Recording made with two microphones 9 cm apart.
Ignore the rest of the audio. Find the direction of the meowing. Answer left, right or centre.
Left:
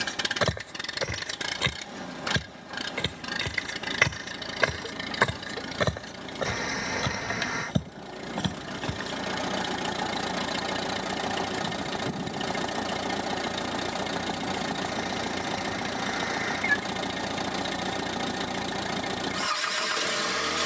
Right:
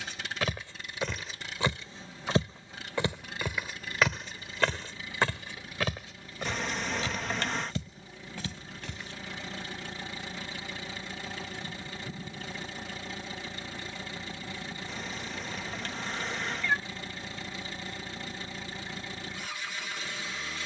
centre.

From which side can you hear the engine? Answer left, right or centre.
left.